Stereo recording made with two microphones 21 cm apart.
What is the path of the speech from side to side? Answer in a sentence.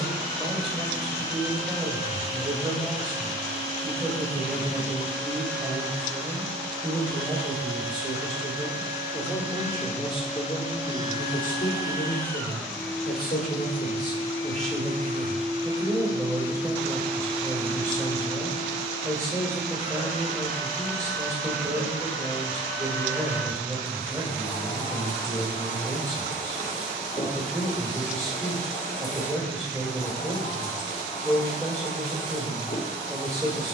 In this clip you hear the speech go left and come back.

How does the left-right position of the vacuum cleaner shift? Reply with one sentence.
You can hear the vacuum cleaner go right and come back.